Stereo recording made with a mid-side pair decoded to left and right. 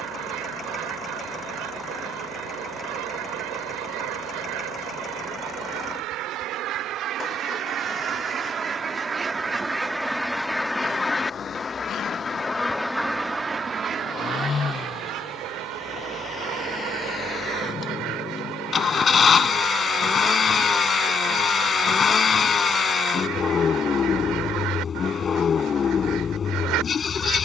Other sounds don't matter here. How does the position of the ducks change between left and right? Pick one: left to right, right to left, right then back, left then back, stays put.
left then back.